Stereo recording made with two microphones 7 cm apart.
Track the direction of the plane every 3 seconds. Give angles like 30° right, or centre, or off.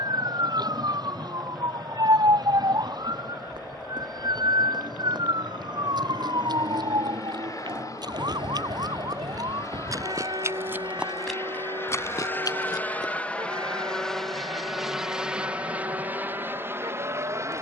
70° left, 60° left, 60° left, 40° left, 10° left, 30° right.